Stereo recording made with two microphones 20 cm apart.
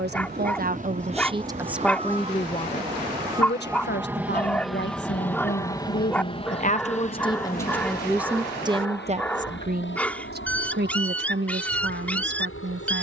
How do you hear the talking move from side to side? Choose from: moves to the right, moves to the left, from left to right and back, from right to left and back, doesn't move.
from right to left and back.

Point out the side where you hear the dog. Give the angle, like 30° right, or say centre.
10° left.